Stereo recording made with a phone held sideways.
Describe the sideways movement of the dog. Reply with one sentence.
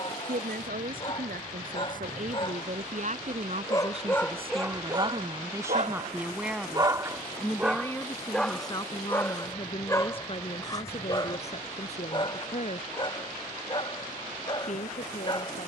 In this clip you hear the dog move from left to right and back again.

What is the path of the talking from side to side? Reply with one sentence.
You can hear the talking move to the left.